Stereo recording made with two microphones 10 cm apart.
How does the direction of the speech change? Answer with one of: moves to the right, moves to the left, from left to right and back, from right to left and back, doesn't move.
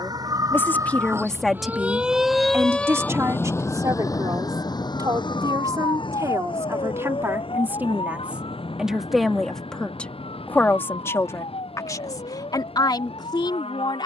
from left to right and back.